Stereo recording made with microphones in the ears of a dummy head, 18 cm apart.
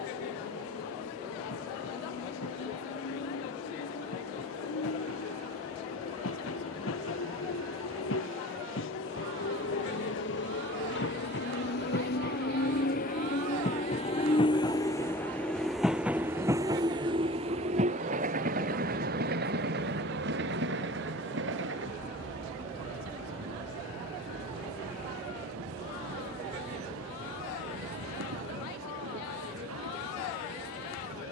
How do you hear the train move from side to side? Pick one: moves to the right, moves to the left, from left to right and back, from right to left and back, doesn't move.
moves to the right.